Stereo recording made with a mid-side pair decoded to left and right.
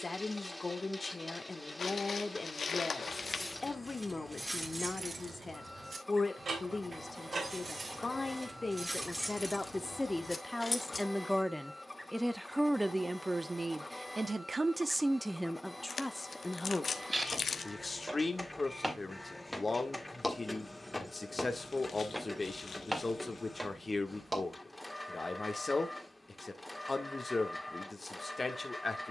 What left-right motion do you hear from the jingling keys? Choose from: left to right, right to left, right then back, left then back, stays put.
right then back.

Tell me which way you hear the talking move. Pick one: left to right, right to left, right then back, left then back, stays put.
right then back.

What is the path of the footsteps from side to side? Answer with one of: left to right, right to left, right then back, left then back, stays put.
left then back.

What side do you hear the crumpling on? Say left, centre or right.
left.